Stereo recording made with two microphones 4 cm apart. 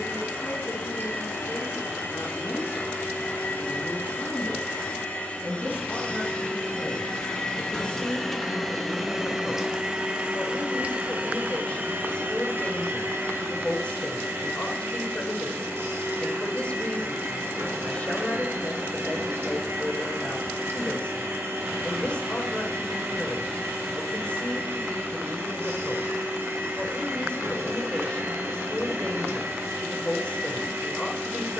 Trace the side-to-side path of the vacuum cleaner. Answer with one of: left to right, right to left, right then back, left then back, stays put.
left to right.